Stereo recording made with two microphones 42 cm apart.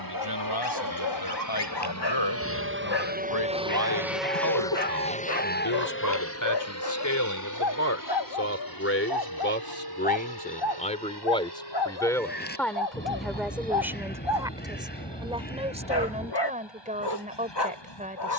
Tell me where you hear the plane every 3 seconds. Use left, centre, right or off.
right, centre, left, left, left, left.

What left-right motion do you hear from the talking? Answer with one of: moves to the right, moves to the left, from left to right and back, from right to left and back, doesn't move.
moves to the right.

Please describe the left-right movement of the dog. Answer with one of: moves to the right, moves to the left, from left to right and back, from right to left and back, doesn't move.
doesn't move.